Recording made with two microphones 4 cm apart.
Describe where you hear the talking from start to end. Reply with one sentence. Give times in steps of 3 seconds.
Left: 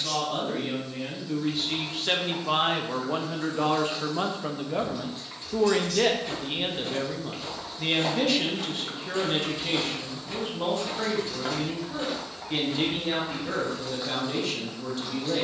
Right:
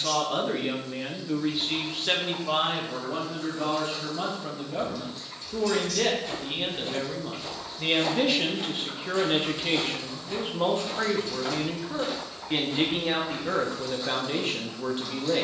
You can hear the talking in the centre from 0 s, on the left from 3 s, in the centre from 6 s and on the right from 9 s.